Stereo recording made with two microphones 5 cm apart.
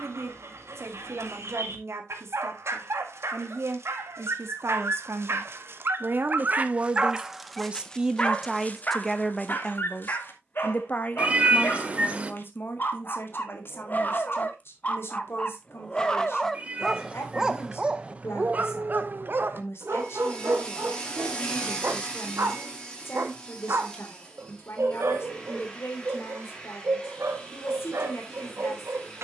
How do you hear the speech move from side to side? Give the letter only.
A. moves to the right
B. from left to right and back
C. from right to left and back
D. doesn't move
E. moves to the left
E.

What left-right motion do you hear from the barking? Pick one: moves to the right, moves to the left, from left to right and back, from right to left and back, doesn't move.
from right to left and back.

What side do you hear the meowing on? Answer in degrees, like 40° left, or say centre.
30° right.